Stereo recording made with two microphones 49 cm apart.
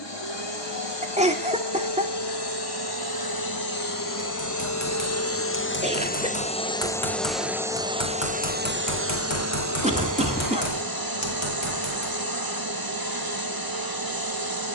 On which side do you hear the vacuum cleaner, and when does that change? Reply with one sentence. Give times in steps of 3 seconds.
You can hear the vacuum cleaner on the left from 0 s, in the centre from 6 s and on the right from 9 s.